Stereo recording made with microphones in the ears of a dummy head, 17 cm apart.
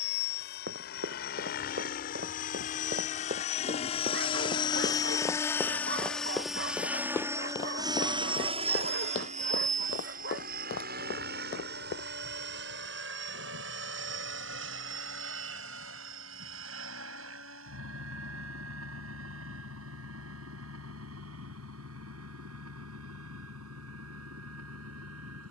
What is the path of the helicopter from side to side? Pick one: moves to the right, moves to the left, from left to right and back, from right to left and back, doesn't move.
moves to the right.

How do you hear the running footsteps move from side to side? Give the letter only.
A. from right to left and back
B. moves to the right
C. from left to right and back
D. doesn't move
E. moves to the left
E.